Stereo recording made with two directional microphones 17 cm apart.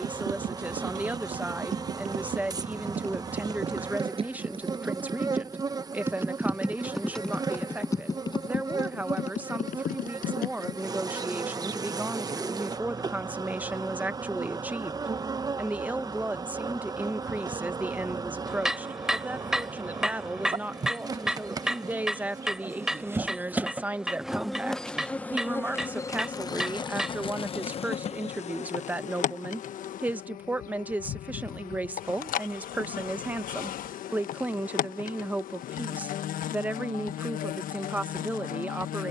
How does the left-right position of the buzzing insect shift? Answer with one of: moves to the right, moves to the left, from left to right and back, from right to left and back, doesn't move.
moves to the left.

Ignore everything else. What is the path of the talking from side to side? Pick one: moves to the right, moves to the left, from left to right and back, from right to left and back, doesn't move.
doesn't move.